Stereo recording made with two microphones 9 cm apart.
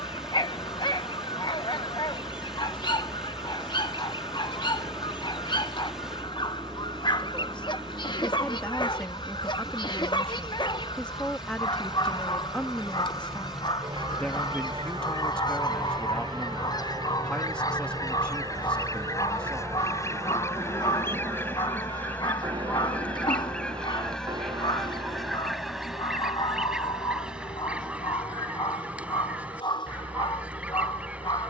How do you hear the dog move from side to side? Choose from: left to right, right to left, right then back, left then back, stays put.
stays put.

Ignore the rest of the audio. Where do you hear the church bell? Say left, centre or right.
right.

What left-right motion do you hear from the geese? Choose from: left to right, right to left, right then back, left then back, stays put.
left to right.